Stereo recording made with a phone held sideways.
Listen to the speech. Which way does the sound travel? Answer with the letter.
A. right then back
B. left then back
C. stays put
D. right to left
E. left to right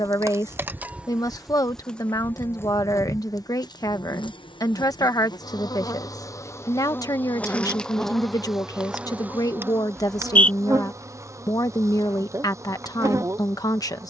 C.